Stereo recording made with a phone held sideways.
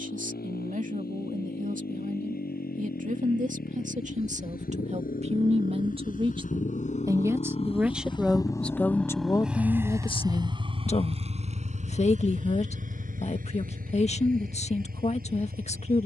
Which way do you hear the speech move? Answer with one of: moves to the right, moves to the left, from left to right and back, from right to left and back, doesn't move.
moves to the left.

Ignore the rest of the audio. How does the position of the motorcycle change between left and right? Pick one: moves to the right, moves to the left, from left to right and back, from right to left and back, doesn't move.
moves to the right.